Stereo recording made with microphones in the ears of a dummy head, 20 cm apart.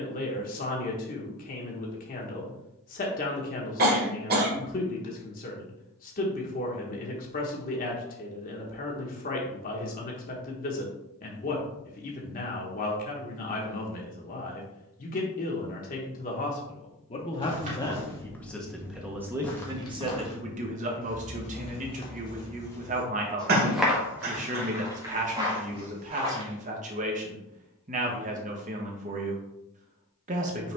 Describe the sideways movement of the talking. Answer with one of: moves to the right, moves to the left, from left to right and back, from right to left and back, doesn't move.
moves to the right.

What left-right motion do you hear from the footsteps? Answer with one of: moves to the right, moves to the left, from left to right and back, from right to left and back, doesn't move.
from right to left and back.